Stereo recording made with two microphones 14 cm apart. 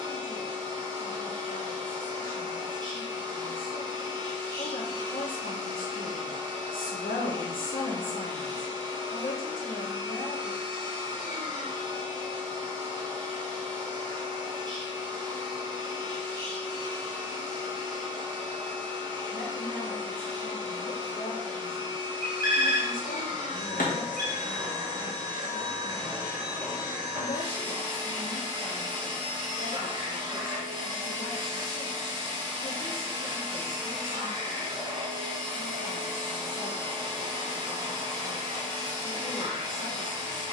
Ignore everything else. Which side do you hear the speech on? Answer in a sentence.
You can hear the speech on the left.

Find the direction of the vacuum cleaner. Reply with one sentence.
In this clip you hear the vacuum cleaner on the right.